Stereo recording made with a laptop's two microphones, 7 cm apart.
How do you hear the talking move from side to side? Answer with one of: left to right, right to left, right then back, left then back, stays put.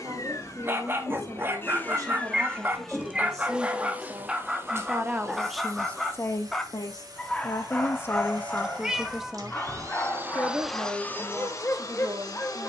left then back.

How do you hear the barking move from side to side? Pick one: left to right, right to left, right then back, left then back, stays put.
right to left.